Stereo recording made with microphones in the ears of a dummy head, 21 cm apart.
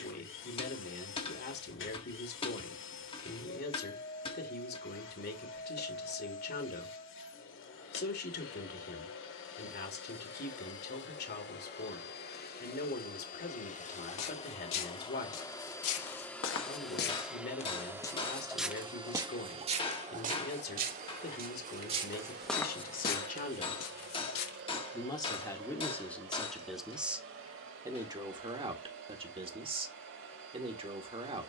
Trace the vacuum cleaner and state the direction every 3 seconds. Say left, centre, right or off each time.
left, left, left, left, left, centre, right, right, right, right, right.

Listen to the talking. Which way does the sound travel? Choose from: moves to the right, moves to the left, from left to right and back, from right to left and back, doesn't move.
moves to the right.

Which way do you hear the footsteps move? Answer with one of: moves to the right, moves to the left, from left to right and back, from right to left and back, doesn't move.
from left to right and back.